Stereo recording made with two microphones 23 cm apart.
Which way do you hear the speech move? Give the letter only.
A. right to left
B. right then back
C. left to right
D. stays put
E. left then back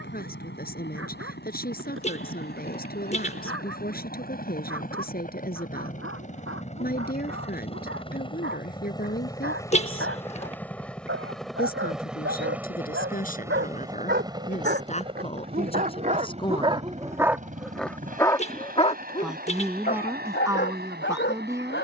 C.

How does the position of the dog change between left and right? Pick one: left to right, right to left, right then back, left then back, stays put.
right to left.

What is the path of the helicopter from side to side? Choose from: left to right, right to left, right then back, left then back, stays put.
left to right.